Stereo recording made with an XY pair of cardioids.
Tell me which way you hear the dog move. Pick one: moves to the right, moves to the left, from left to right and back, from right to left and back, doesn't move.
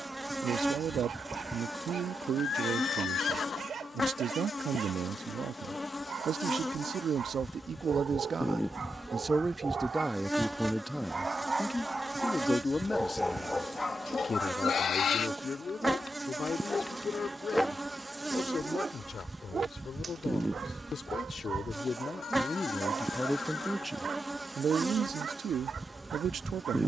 from right to left and back.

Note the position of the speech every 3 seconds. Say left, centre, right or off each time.
right, right, right, centre, left, left, left, left, right.